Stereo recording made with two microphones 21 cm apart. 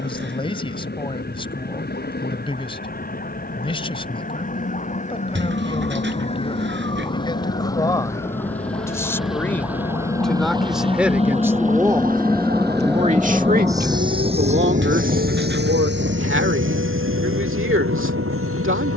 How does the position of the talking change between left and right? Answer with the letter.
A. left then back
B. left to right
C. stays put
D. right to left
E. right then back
B.